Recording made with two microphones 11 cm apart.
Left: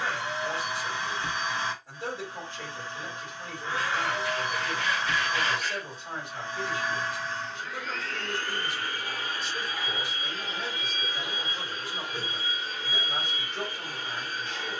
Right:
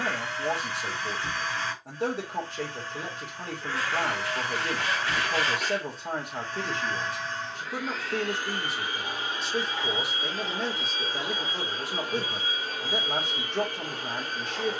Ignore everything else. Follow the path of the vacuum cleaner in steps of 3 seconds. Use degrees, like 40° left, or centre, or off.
20° left, 20° left, centre, 30° right, 50° right.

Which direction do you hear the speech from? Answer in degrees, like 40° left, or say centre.
70° right.